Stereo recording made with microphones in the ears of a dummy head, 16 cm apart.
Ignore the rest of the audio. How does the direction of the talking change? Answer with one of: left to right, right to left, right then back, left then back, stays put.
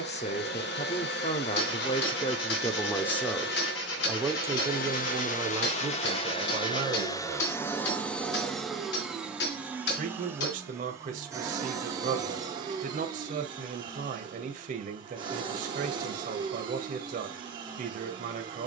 left to right.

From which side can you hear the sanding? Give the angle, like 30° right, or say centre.
80° left.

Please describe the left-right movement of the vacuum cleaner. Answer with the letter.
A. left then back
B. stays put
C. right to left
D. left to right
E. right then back
D.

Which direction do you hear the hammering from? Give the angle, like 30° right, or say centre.
70° left.